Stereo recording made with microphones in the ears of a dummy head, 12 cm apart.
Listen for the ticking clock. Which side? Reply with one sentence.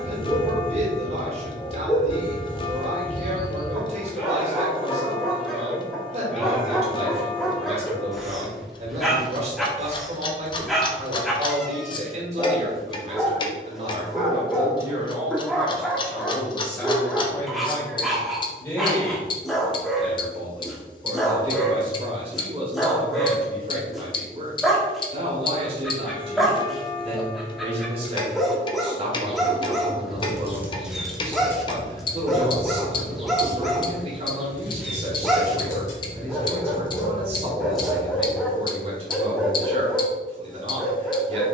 In this clip you hear the ticking clock on the left.